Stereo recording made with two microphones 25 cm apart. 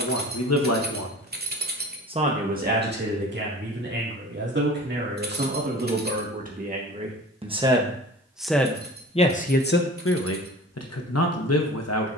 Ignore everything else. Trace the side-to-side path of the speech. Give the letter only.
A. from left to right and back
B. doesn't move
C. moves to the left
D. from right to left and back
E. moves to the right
A.